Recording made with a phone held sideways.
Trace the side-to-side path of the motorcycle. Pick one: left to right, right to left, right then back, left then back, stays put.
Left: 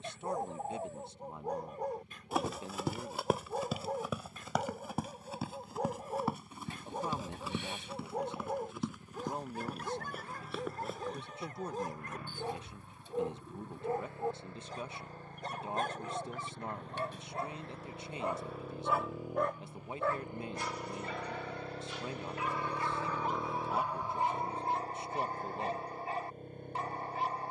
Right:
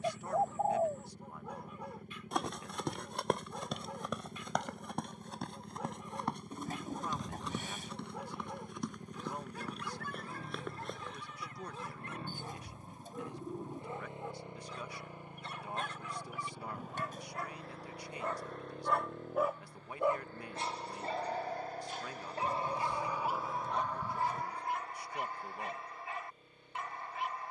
right to left.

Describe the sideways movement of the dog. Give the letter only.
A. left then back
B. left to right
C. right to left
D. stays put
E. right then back
E.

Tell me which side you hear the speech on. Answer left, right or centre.
left.